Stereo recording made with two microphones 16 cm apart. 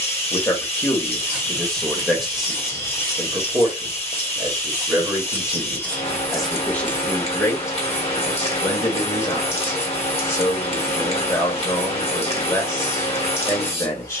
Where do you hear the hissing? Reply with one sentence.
In this clip you hear the hissing on the left.